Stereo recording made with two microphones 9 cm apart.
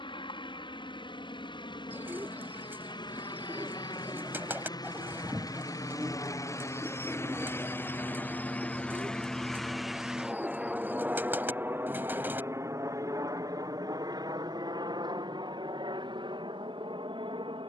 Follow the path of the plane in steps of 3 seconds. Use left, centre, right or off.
left, left, left, centre, right, right.